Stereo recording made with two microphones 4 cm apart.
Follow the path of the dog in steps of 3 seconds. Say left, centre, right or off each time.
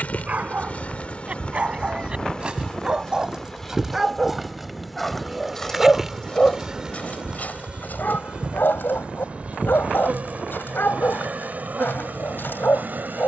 right, centre, left, left, left.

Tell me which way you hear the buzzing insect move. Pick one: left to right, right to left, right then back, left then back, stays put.
left to right.